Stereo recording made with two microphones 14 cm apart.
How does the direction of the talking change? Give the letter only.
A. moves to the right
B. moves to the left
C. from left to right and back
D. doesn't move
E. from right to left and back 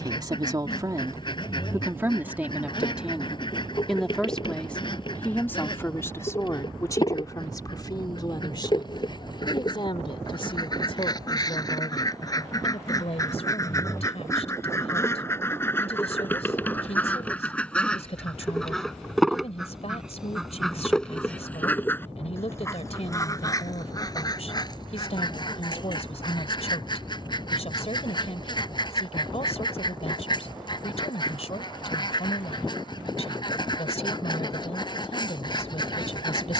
B.